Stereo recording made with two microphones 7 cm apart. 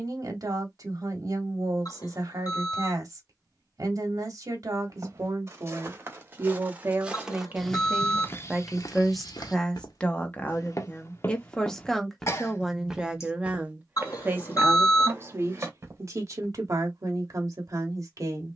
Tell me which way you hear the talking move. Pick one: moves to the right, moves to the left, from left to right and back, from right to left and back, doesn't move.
from right to left and back.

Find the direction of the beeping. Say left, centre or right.
left.